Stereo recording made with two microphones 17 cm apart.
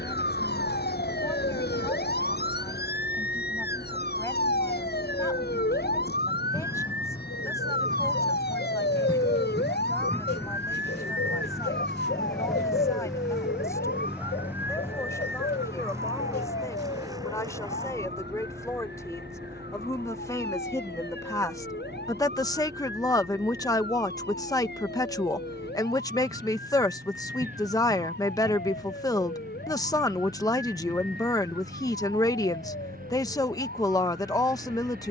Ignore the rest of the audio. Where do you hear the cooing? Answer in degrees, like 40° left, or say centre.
90° left.